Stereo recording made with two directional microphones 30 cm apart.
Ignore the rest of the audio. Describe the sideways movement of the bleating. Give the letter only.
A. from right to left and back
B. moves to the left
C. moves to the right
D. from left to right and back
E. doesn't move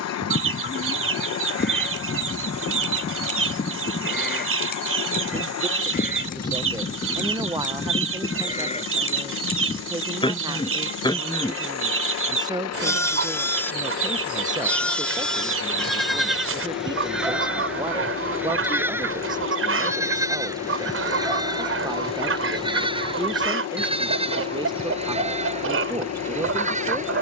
C.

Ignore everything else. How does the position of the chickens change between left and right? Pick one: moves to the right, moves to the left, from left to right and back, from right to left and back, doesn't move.
doesn't move.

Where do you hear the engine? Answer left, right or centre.
left.